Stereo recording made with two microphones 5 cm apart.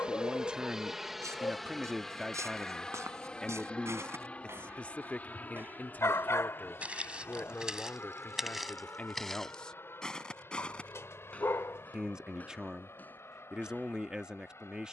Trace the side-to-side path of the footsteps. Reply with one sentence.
You can hear the footsteps move from right to left.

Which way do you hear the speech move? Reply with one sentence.
You can hear the speech go left and come back.